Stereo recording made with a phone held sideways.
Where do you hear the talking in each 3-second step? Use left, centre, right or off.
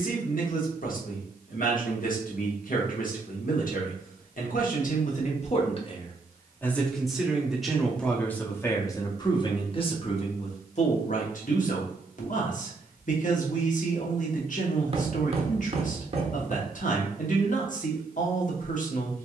left, left, centre, left, left, left, left.